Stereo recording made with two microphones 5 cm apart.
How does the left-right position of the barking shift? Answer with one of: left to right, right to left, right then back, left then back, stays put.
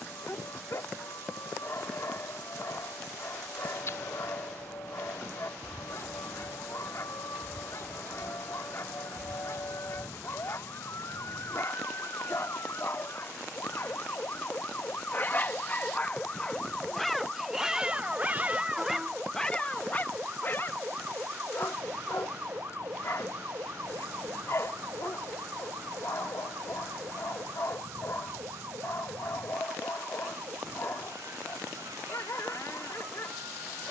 right then back.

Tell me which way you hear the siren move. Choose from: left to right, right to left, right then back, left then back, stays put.
left to right.